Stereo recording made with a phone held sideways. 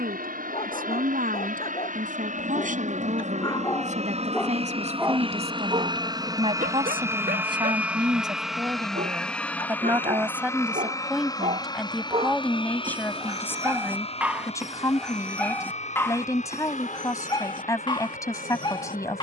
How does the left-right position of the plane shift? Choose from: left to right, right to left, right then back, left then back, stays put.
right to left.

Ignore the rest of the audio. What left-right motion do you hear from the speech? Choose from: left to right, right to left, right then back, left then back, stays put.
right to left.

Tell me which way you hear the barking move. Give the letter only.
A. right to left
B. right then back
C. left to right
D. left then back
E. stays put
B.